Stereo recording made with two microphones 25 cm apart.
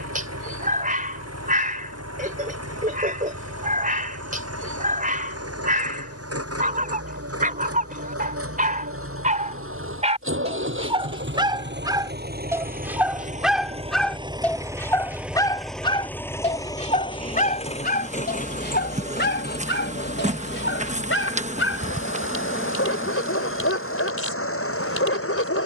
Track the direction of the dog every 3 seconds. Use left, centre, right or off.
right, right, right, right, centre, left, left, left, left.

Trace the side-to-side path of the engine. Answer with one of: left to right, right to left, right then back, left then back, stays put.
right to left.